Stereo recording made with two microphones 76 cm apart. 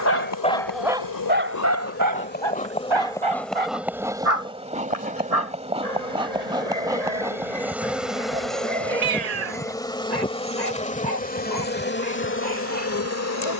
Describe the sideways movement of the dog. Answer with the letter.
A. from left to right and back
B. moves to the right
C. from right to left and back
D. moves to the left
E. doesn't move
B.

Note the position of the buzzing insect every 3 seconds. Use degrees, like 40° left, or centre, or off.
20° left, centre, centre, 10° left, 20° left.